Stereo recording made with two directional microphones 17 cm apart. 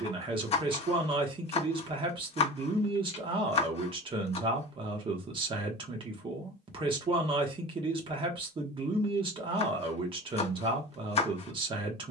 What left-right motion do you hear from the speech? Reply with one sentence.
You can hear the speech stay in one place.